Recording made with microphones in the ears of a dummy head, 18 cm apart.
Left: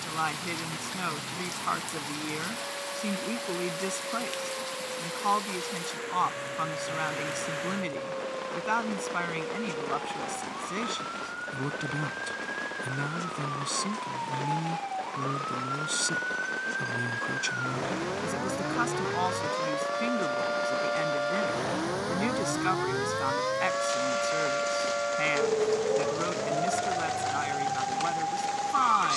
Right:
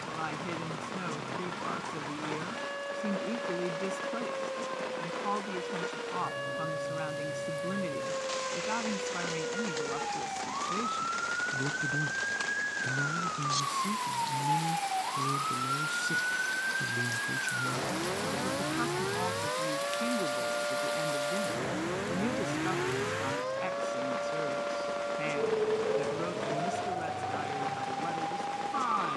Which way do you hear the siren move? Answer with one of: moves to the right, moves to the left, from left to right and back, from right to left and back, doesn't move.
moves to the left.